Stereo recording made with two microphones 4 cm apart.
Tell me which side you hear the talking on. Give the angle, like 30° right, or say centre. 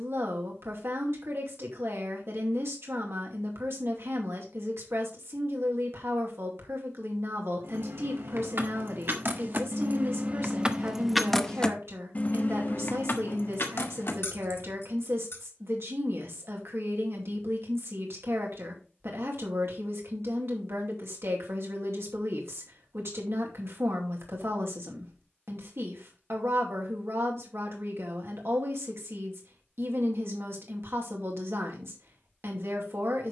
70° right.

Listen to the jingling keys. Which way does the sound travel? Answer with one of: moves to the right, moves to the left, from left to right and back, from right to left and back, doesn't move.
moves to the left.